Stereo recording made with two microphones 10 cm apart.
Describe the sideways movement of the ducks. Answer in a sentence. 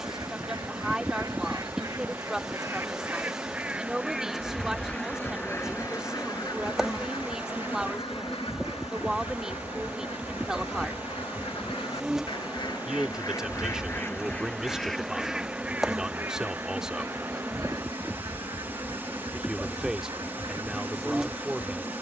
You can hear the ducks move from right to left and back again.